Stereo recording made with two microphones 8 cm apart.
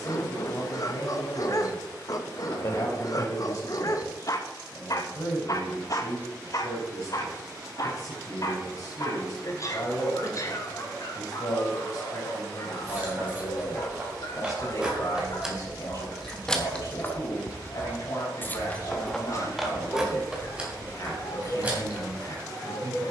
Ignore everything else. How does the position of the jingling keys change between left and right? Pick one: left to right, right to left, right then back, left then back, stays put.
left then back.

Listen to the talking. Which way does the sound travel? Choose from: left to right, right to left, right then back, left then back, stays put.
stays put.